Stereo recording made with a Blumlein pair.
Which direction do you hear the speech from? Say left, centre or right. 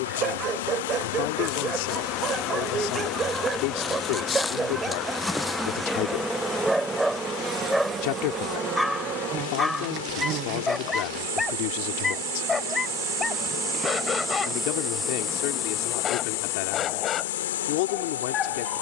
left.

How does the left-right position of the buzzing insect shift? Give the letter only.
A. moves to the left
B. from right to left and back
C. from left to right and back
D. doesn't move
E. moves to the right
C.